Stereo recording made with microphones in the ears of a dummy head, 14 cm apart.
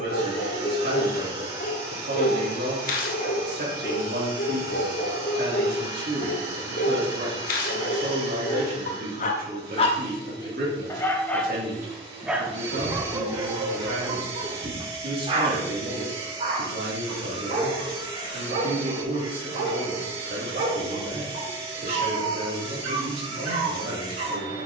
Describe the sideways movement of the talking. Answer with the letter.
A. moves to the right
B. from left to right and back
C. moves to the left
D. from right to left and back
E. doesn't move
E.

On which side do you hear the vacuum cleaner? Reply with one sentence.
In this clip you hear the vacuum cleaner on the right.